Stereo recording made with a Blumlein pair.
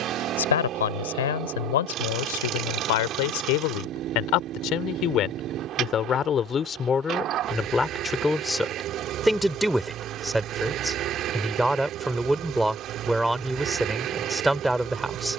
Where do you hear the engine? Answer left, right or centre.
right.